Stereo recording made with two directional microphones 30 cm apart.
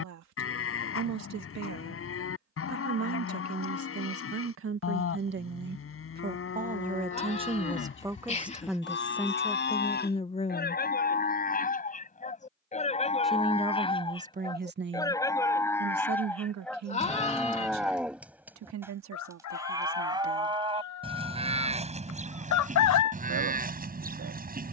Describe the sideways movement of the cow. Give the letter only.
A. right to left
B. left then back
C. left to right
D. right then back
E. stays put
C.